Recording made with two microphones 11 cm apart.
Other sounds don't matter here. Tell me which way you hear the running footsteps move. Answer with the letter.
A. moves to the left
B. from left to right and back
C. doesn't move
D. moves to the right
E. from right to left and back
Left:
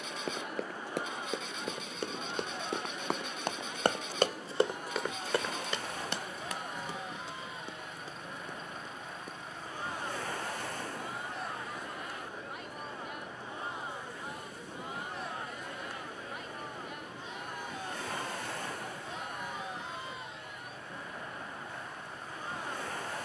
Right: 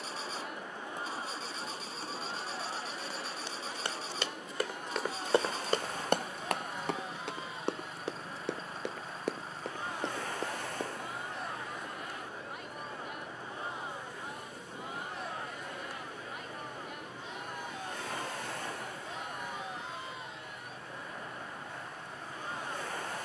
D.